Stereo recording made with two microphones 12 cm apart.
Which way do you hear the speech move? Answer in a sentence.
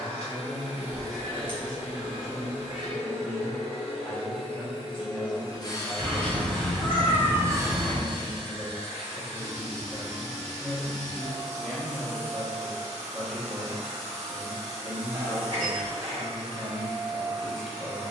You can hear the speech stay put.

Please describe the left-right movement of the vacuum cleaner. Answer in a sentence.
You can hear the vacuum cleaner travel towards the right.